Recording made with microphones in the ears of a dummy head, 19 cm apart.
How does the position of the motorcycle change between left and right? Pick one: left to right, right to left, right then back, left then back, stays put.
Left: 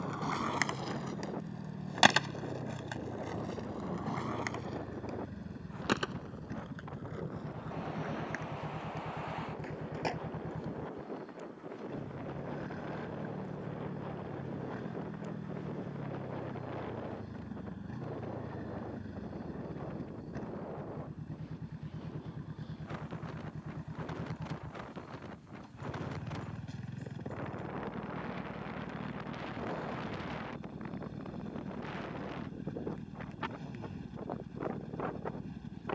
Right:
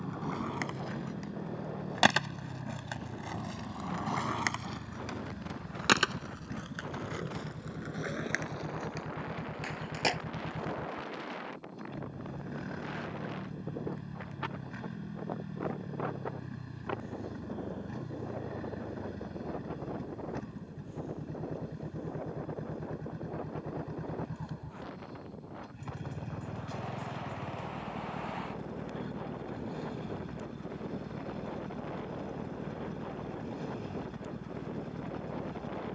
stays put.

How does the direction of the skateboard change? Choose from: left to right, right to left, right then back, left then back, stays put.
left to right.